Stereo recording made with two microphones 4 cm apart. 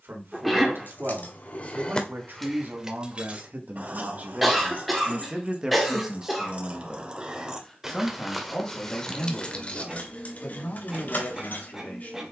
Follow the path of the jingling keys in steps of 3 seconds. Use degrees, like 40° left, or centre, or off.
30° left, 40° right, 20° right, 40° left.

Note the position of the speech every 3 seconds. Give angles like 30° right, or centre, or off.
60° right, 40° right, 10° left, 40° left.